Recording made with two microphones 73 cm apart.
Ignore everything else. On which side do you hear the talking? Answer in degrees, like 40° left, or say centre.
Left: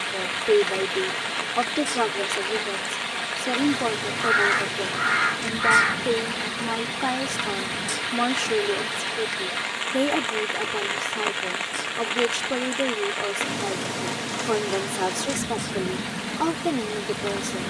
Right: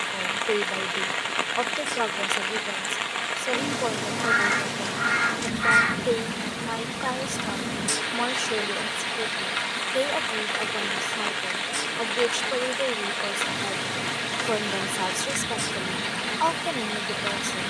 80° left.